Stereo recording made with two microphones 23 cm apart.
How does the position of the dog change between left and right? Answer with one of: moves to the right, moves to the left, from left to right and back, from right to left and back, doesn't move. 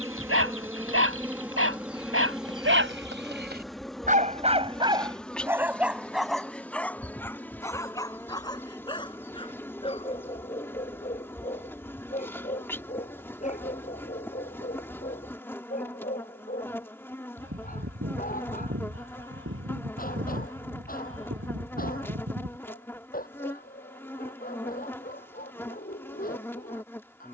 moves to the left.